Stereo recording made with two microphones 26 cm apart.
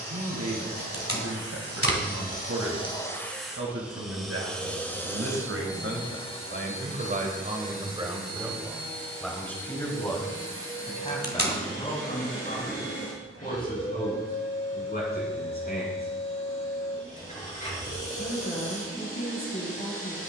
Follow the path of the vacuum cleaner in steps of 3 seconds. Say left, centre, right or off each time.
left, centre, left, left, left, left, left.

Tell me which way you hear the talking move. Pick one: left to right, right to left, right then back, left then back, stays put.
right to left.